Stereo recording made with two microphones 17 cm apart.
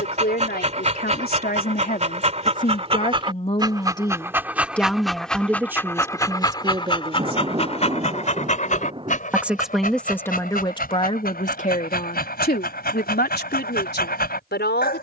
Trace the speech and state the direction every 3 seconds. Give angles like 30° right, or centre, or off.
60° left, 10° left, 30° right, 20° left, 70° left.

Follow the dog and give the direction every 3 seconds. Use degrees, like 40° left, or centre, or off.
40° right, 10° right, 40° left, 60° left, 60° left.